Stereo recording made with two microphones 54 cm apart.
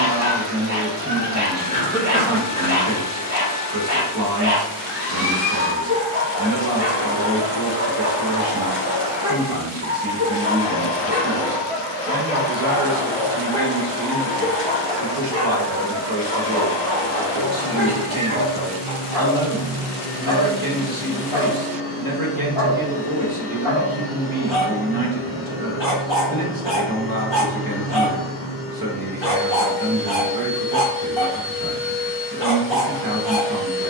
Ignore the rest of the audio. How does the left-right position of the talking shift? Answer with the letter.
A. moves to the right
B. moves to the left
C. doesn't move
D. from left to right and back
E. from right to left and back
C.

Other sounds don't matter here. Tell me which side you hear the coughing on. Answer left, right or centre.
centre.